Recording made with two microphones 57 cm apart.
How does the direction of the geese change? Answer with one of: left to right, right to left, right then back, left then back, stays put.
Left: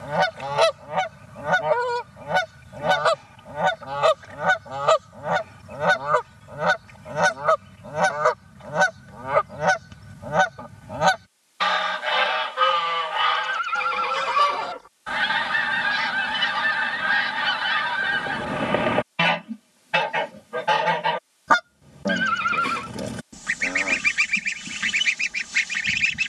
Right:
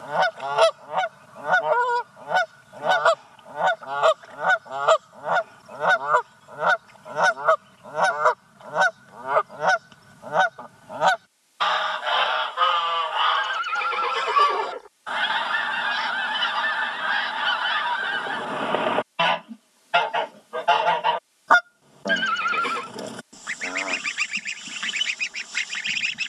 stays put.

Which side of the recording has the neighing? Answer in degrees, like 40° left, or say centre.
30° left.